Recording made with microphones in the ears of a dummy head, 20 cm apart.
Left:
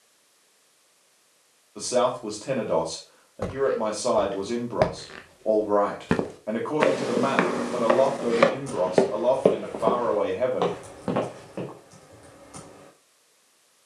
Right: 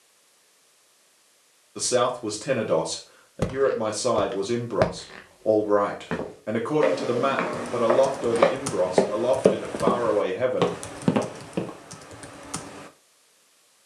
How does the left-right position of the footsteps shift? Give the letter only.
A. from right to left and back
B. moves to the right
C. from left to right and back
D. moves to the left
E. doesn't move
A.